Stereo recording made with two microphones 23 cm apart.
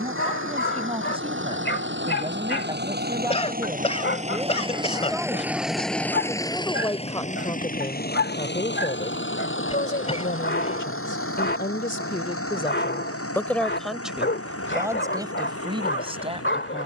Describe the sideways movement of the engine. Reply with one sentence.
You can hear the engine go from the right side to the left.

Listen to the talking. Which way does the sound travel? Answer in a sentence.
You can hear the talking move from right to left and back again.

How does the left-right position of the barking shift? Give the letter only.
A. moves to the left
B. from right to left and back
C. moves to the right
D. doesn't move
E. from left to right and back
D.